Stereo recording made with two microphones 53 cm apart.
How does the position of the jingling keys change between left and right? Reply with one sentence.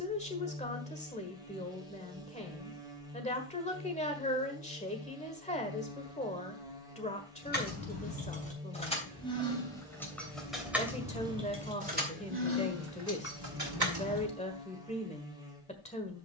You can hear the jingling keys move from left to right.